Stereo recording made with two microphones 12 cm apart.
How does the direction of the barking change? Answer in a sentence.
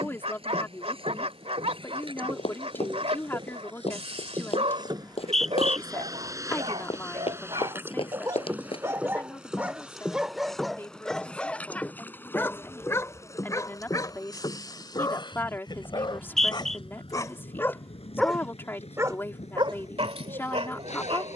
In this clip you hear the barking move from right to left and back again.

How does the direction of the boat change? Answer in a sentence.
You can hear the boat go from the right side to the left.